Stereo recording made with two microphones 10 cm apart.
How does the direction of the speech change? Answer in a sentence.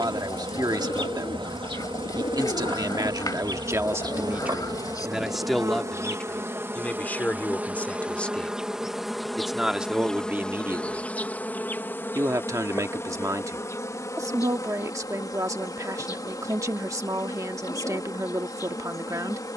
In this clip you hear the speech go left and come back.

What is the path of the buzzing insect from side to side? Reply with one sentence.
In this clip you hear the buzzing insect move to the left.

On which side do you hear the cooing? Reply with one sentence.
In this clip you hear the cooing on the left.